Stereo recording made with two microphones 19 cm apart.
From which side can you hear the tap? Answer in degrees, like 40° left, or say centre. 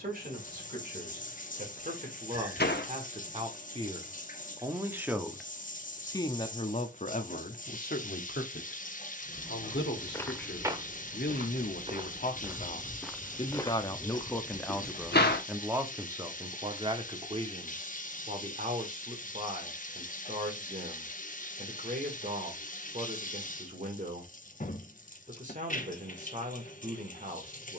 40° left.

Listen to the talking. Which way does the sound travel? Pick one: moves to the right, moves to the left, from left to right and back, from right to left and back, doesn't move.
from right to left and back.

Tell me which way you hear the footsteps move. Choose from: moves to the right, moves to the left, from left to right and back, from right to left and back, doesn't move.
from left to right and back.